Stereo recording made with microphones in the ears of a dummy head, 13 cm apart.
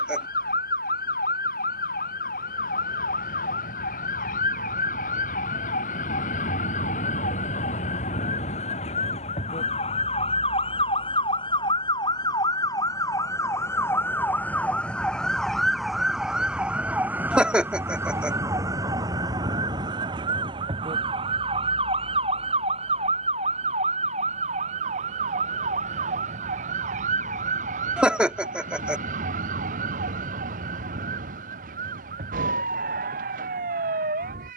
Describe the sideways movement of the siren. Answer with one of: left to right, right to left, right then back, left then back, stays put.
left to right.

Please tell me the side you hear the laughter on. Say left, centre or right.
centre.